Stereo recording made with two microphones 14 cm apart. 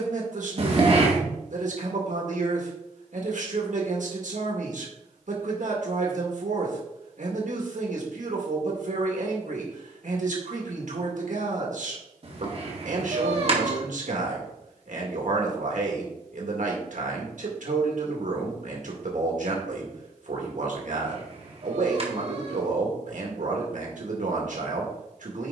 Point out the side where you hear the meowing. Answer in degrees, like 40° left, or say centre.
50° right.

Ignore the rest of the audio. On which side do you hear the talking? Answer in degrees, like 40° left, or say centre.
70° right.